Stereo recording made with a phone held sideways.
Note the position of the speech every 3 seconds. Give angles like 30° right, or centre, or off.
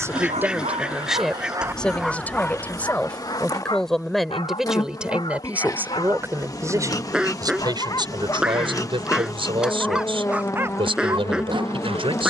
centre, centre, 30° right, 50° right.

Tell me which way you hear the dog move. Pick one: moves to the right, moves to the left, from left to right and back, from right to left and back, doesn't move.
from right to left and back.